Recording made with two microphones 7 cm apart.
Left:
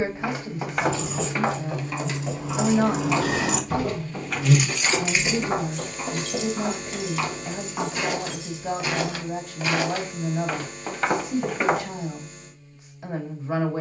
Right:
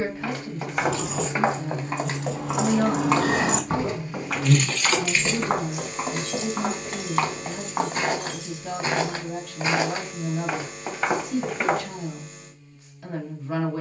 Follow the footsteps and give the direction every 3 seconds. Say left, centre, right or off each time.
right, right, right, centre, off.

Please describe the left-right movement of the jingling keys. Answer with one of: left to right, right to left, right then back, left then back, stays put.
left then back.